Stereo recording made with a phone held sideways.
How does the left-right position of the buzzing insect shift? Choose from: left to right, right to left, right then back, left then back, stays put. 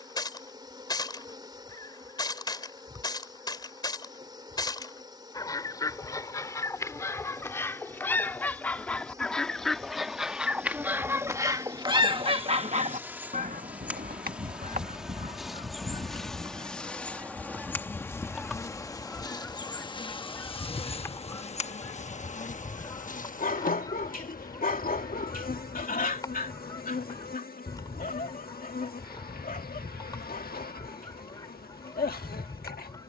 right to left.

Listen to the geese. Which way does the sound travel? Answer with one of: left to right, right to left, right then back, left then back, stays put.
right then back.